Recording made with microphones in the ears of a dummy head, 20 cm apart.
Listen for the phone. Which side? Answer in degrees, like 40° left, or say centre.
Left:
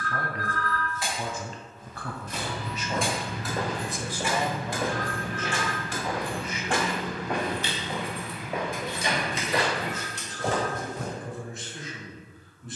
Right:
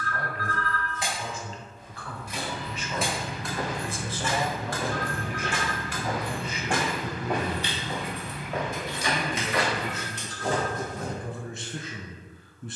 60° left.